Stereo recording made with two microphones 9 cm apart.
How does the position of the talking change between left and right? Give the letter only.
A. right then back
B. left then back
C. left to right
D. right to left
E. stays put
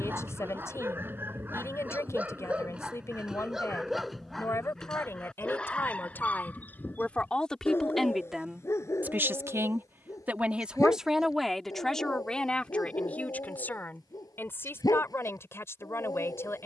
A.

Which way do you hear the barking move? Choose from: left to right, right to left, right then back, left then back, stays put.
right to left.